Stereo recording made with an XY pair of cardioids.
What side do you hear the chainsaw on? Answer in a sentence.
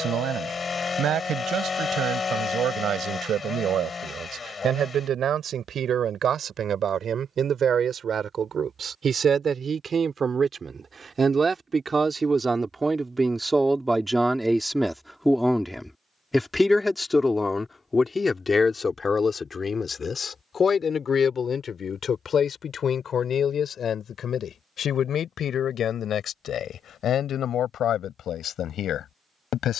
You can hear the chainsaw on the left.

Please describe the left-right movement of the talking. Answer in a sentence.
You can hear the talking move from right to left.